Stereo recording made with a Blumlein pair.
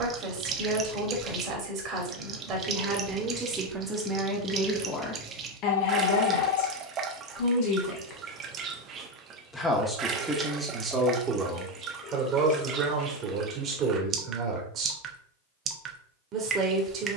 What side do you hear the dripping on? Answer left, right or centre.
right.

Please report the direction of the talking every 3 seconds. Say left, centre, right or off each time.
right, centre, left, centre, right, right.